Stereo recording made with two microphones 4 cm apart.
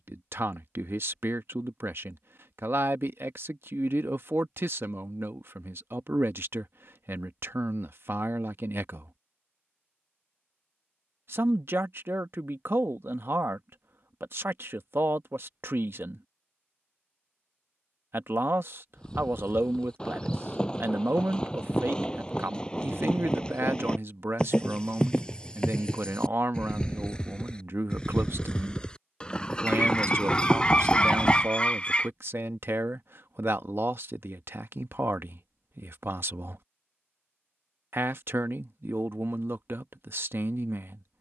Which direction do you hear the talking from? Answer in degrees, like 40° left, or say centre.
60° right.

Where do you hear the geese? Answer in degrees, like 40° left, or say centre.
20° left.